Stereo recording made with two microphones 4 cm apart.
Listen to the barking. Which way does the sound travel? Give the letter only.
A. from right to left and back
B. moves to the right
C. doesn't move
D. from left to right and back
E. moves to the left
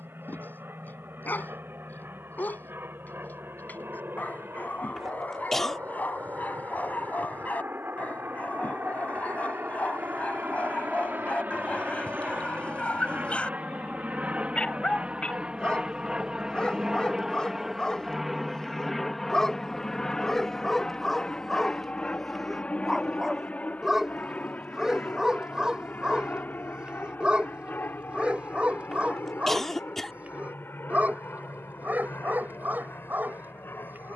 B.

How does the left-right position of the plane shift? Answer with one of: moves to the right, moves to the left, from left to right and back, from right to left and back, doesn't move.
moves to the left.